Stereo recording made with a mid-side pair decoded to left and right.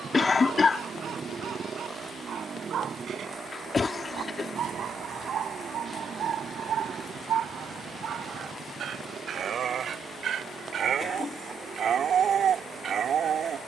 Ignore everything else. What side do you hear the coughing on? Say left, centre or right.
left.